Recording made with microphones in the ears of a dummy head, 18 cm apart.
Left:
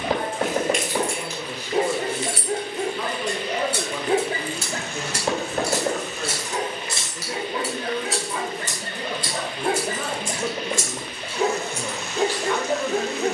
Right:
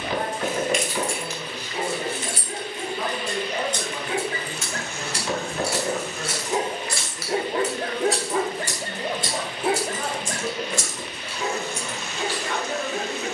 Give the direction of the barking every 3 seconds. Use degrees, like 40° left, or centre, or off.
40° left, 30° left, 30° right, 10° left, 40° left.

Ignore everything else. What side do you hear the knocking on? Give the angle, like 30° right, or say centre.
40° left.